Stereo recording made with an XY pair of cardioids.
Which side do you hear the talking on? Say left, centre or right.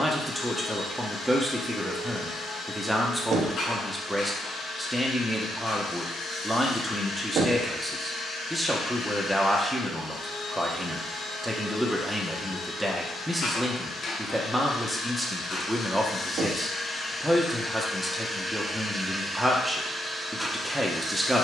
centre.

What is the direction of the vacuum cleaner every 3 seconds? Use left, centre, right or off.
left, left, left, left, left, left, centre.